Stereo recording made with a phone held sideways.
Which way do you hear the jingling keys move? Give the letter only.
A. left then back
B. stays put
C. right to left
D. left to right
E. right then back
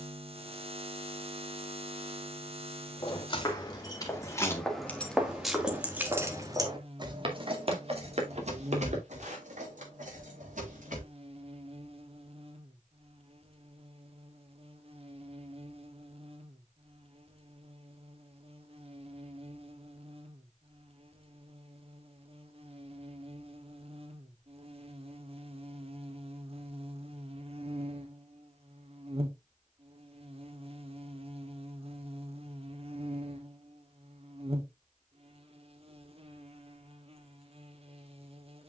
D.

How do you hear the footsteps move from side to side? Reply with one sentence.
You can hear the footsteps travel towards the right.